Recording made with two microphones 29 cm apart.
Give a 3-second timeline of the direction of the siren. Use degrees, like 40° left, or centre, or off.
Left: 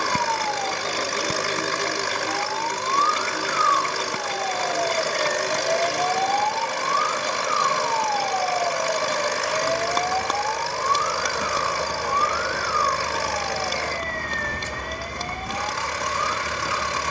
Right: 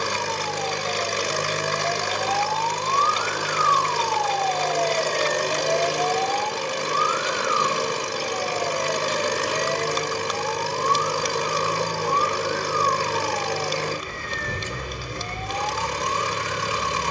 40° left, 10° left, 20° right, 40° right, 50° right, 50° right.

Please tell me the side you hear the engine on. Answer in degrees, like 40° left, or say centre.
40° right.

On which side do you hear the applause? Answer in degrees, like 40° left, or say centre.
60° left.